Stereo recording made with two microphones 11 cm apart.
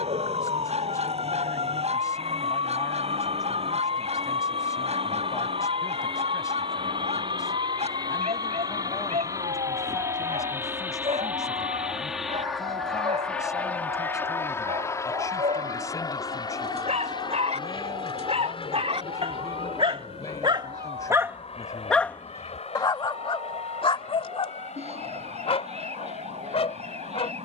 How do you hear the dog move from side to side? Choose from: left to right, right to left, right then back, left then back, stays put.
right to left.